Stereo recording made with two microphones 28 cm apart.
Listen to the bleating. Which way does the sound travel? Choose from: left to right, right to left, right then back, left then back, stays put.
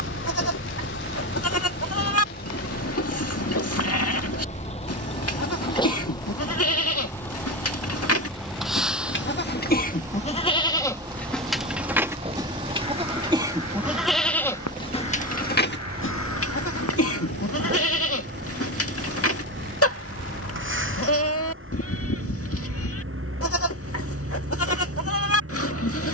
right then back.